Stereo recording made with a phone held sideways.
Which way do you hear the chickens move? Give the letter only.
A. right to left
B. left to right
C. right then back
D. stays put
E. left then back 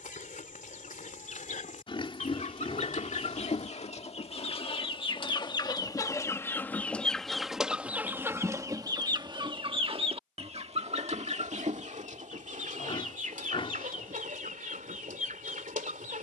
B.